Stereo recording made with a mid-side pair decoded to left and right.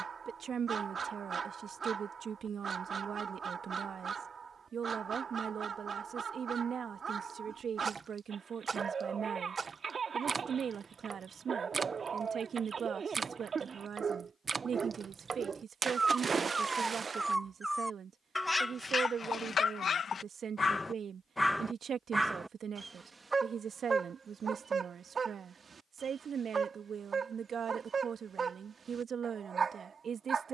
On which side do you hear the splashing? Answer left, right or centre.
right.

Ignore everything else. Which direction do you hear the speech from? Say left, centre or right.
right.